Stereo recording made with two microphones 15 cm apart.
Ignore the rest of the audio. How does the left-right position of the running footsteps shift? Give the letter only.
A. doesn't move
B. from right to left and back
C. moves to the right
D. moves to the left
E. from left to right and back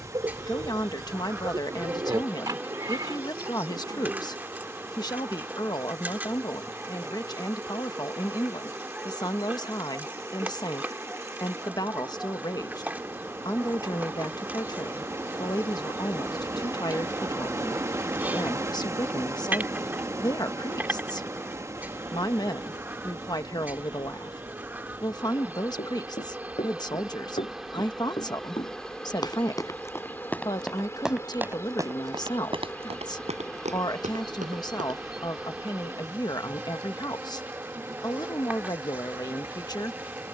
C.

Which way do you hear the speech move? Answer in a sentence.
In this clip you hear the speech stay put.